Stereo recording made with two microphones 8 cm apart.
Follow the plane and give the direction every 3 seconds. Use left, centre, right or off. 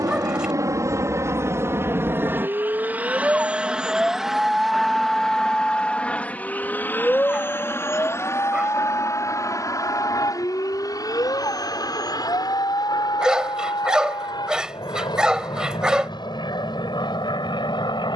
right, centre, left, left, left, left.